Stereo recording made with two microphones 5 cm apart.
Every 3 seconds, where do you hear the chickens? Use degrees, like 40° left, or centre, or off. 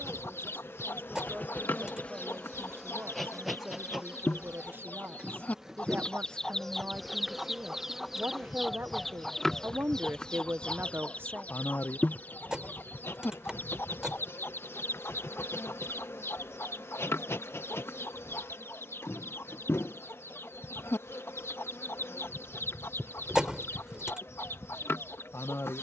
70° left, 50° left, centre, 20° left, 50° left, 70° left, 70° left, 70° left, 70° left.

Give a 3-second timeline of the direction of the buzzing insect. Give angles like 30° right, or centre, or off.
40° left, 10° right, centre, 40° left, 60° left, 70° left, 70° left, 70° left, 70° left.